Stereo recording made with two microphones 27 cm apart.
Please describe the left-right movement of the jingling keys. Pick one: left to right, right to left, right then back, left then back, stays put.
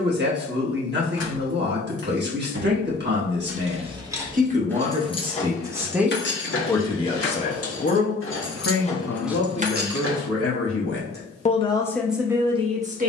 left then back.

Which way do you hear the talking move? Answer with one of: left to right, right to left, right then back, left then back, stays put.
left then back.